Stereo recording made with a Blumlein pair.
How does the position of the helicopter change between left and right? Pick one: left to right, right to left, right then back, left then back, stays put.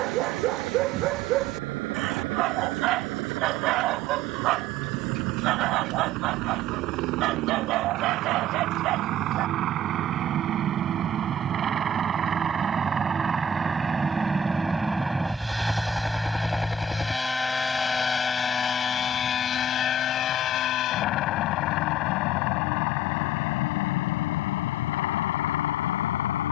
right to left.